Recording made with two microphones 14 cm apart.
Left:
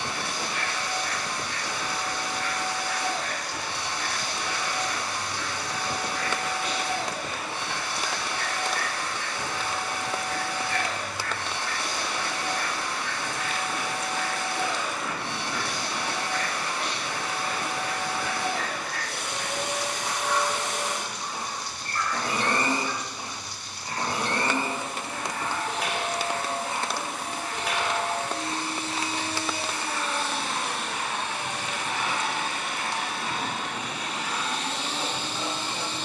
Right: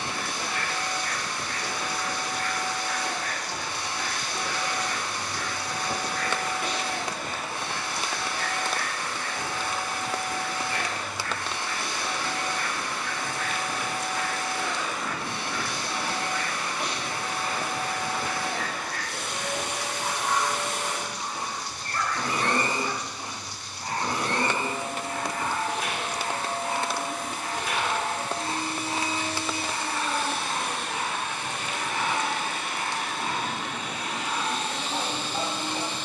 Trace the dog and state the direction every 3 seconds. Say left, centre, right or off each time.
right, right, right, right, centre, centre, right, right, right, right, right, right.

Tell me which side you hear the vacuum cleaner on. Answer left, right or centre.
left.